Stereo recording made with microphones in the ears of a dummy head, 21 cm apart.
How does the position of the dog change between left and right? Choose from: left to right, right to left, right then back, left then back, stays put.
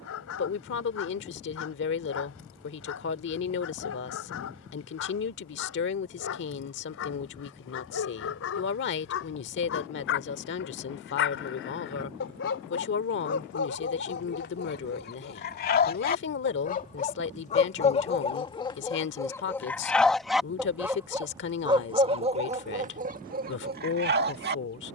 left to right.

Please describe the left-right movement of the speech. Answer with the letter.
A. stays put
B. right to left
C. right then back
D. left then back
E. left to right
A.